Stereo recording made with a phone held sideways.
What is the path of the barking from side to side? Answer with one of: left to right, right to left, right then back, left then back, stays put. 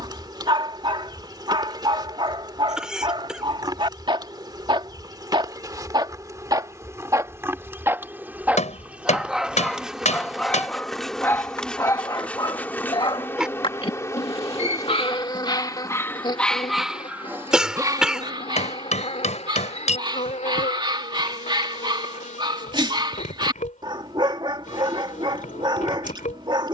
left then back.